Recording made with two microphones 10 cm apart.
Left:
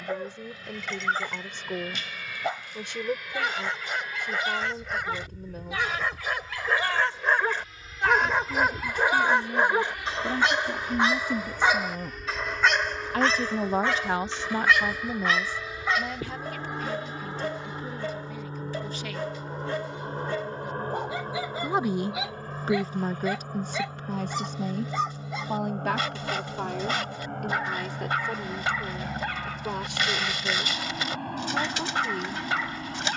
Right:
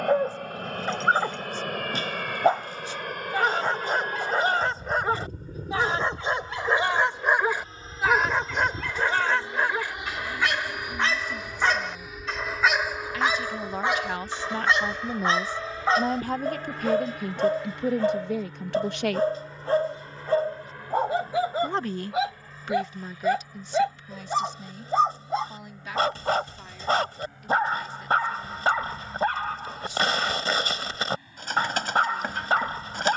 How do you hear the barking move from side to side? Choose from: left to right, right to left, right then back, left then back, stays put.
left then back.